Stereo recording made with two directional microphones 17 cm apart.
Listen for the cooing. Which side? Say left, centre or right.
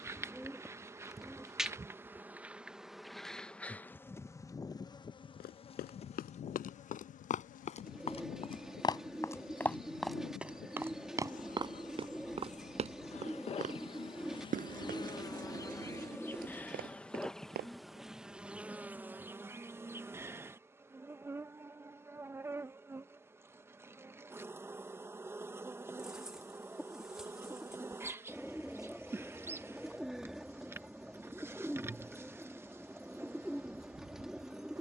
centre.